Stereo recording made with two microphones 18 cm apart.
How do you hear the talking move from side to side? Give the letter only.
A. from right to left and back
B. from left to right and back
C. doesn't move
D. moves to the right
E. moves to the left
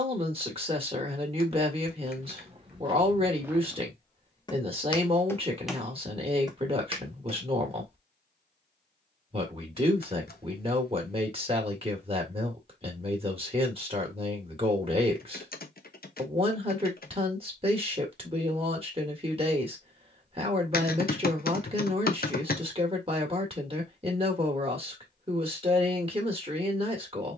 C.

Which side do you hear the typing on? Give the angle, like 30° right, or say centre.
50° left.